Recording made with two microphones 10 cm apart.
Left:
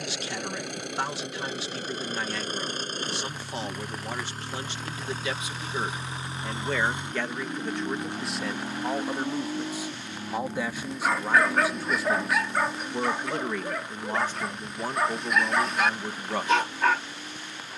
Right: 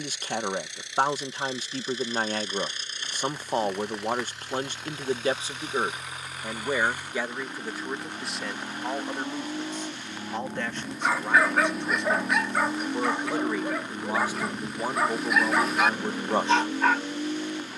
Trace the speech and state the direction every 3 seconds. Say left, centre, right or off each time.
right, right, centre, centre, centre, right.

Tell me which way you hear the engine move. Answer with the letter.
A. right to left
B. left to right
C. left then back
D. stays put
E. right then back
B.